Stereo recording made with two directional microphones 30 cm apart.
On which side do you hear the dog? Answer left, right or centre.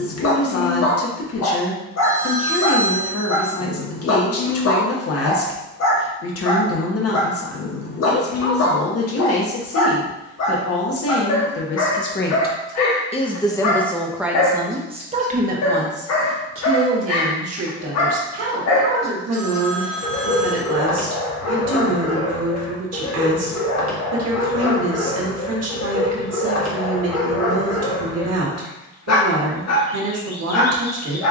left.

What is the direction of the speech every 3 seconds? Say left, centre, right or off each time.
left, left, left, left, centre, right, right, right, right, right, right.